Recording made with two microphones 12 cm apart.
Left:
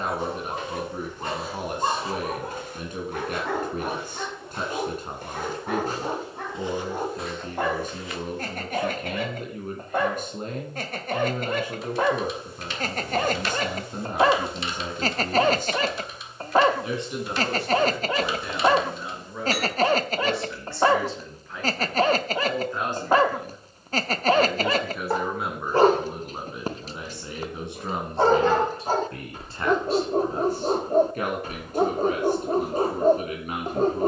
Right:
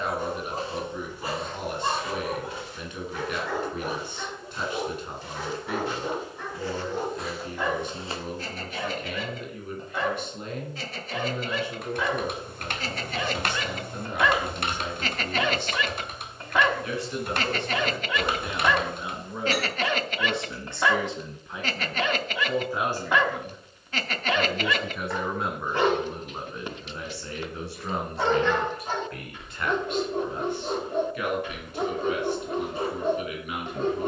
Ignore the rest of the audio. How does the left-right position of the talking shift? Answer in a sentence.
You can hear the talking move from left to right and back again.